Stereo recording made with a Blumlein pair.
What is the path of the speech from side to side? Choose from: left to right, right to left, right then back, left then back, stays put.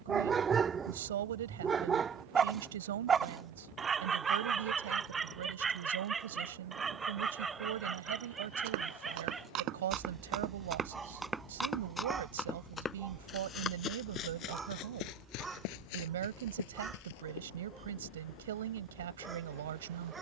stays put.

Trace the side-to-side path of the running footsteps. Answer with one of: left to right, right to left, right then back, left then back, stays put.
right to left.